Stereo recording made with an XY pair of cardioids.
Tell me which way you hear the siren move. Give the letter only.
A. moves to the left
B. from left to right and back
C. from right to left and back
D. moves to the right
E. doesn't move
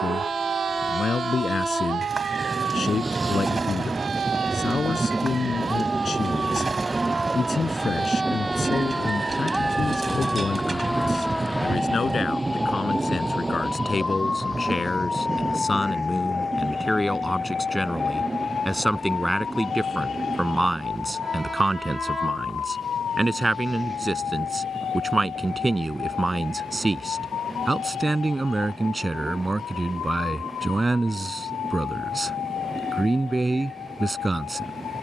A.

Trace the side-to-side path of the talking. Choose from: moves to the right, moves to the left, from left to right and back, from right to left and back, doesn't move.
moves to the right.